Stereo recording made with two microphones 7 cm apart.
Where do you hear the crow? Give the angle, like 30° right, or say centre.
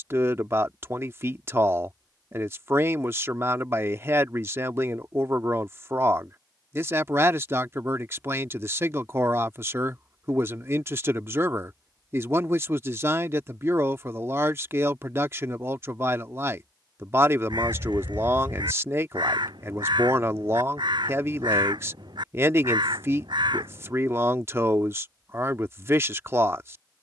70° right.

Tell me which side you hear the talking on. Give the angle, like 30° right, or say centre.
30° right.